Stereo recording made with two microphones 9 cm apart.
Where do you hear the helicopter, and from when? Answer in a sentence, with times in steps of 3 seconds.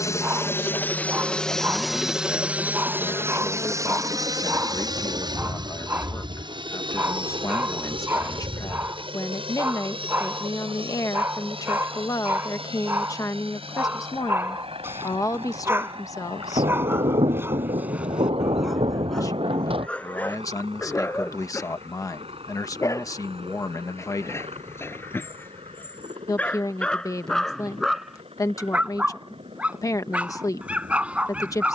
In this clip you hear the helicopter in the centre from 0 s and on the right from 3 s.